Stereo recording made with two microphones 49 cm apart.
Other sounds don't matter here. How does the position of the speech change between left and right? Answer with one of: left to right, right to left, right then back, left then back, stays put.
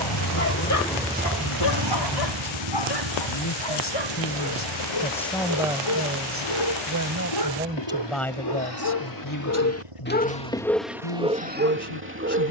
right then back.